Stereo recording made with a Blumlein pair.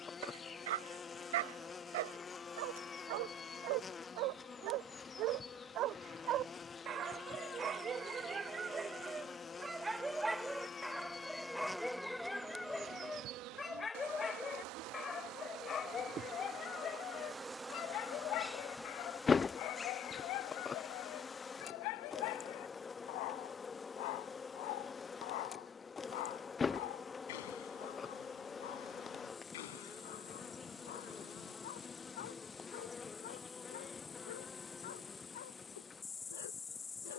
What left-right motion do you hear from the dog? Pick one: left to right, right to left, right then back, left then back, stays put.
right to left.